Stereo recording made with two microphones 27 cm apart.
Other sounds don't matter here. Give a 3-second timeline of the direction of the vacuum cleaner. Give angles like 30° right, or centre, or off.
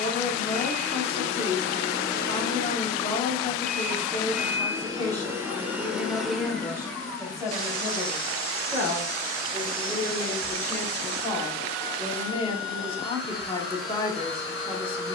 40° left, centre, 10° left, 40° left, 40° left.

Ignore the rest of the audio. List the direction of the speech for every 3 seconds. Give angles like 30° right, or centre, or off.
20° left, 20° left, 10° right, 10° left, 20° left.